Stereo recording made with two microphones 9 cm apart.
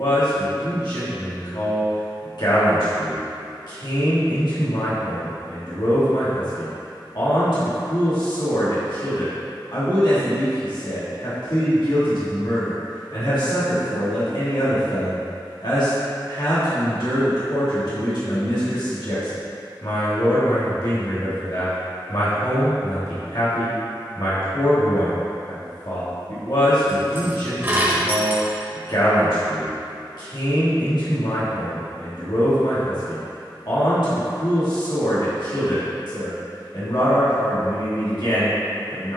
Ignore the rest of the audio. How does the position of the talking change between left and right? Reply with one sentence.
In this clip you hear the talking stay in one place.